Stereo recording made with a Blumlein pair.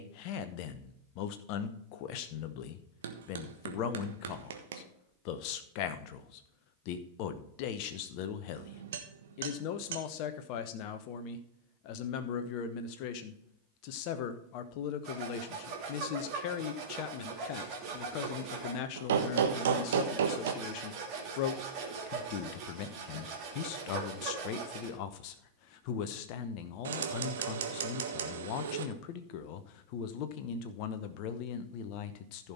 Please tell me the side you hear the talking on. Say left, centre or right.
left.